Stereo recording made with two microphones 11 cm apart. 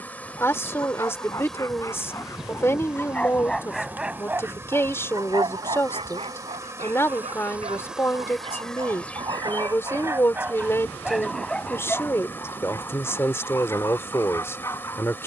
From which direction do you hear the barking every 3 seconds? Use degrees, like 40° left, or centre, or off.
30° left, 20° right, 60° right, 20° right, 20° left.